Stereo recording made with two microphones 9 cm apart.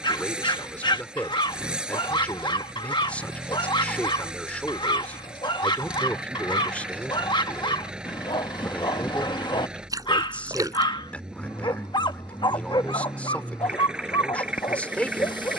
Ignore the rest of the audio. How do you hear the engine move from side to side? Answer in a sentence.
You can hear the engine stay put.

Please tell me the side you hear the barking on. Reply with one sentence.
You can hear the barking on the left.